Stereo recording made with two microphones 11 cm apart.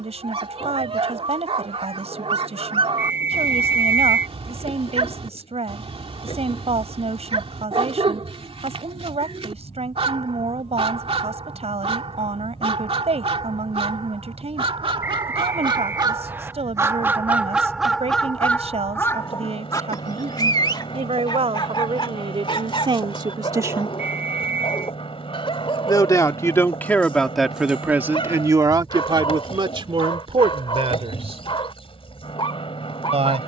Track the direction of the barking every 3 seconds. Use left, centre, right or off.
right, right, right, right, right, right, left, left, left, left, left.